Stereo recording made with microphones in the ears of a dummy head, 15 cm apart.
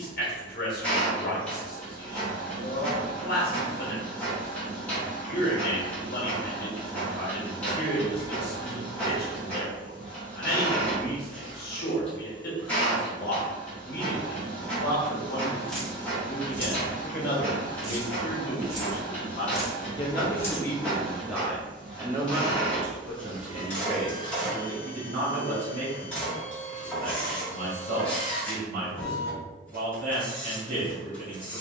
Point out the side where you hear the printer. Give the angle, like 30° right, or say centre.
10° left.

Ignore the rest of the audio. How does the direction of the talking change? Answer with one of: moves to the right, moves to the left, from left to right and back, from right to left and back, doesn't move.
moves to the right.